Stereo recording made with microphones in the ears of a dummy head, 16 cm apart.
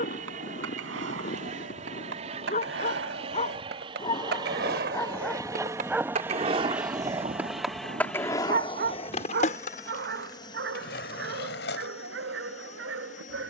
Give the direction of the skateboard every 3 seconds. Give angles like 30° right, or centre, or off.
70° right, 60° right, 10° right, 50° left, off.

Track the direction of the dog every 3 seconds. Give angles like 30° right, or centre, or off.
40° left, 20° left, 40° right, 70° right, 80° right.